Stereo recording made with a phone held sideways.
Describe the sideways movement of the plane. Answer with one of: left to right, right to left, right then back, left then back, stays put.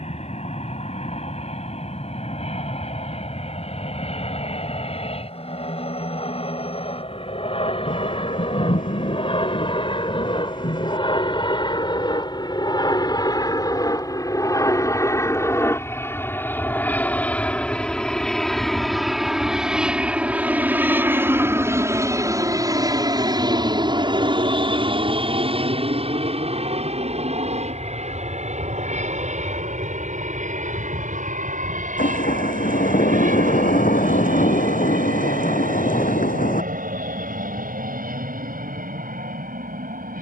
left to right.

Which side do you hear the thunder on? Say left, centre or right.
left.